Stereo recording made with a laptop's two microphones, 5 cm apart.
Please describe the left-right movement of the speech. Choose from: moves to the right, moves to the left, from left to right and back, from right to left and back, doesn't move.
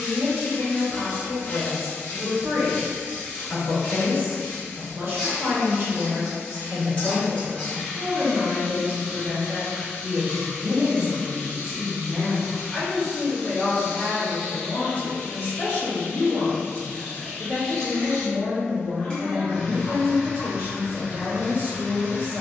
from right to left and back.